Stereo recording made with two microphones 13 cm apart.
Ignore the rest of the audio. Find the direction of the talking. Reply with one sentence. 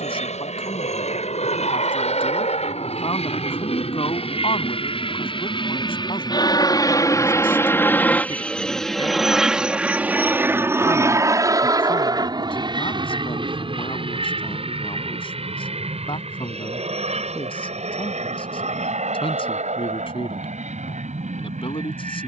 You can hear the talking on the left.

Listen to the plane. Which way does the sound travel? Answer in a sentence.
In this clip you hear the plane move from left to right.